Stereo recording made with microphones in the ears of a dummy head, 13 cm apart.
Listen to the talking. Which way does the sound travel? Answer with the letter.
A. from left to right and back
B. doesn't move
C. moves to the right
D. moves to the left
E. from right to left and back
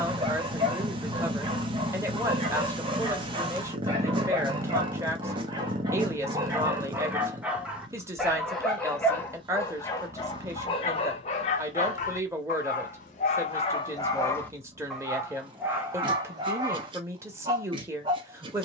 B.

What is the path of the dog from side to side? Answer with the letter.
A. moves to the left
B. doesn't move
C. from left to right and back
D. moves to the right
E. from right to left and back
E.